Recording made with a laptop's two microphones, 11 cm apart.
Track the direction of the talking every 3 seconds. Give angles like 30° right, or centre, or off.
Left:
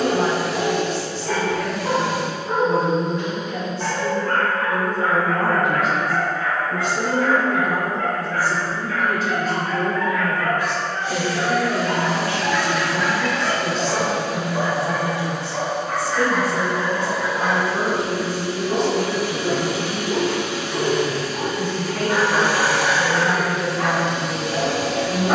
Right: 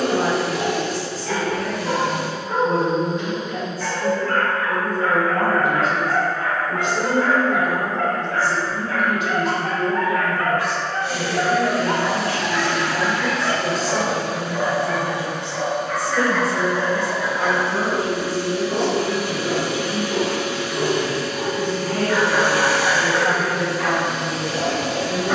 40° right, 40° right, centre, 40° left, centre, 30° right, 40° right, 40° right, 40° right.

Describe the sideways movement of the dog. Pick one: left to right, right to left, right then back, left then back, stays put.
right then back.